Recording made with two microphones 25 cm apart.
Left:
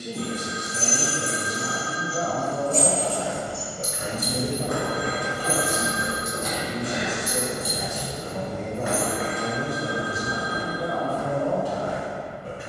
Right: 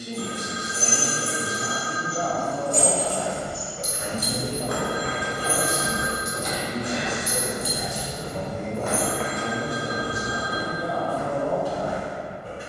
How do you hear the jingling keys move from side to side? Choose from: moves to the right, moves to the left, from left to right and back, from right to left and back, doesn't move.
from left to right and back.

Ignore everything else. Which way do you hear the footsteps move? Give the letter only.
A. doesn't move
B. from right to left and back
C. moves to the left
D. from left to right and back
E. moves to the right
B.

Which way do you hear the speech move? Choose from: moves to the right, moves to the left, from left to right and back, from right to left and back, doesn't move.
from left to right and back.